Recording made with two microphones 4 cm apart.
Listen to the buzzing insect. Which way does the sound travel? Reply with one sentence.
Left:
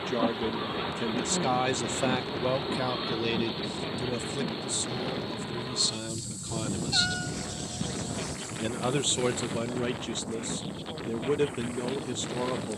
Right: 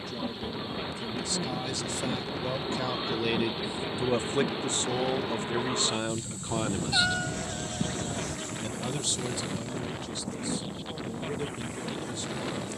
In this clip you hear the buzzing insect move to the right.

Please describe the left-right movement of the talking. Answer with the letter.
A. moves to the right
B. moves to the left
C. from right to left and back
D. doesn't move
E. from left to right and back
E.